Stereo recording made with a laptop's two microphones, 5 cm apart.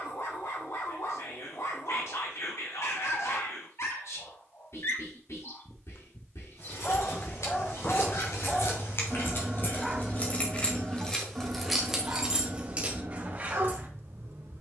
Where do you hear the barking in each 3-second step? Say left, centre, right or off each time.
left, left, left, right, right.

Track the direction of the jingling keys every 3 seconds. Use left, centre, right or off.
off, off, left, left, right.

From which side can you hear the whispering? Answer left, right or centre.
left.